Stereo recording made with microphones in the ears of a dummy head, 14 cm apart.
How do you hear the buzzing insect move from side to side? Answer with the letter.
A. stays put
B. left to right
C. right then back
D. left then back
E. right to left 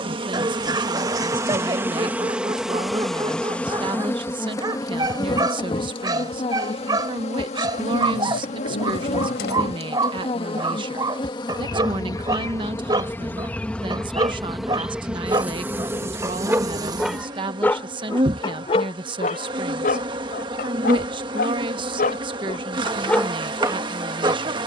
D.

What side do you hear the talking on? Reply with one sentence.
You can hear the talking on the right.